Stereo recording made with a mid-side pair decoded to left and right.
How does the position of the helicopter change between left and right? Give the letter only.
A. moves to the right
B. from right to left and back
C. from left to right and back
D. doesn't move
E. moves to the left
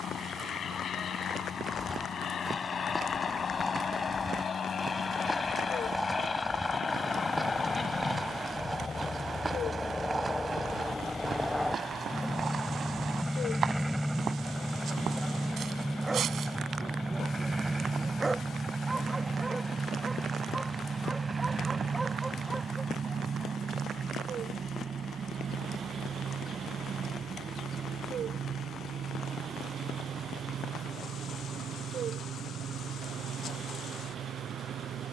A.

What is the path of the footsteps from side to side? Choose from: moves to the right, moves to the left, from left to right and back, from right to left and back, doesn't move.
moves to the right.